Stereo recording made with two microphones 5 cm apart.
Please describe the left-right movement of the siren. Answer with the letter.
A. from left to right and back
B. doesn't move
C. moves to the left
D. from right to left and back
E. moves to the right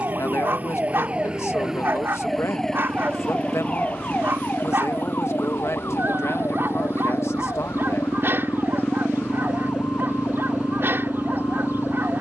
C.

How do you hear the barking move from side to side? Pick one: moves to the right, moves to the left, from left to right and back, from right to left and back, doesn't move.
doesn't move.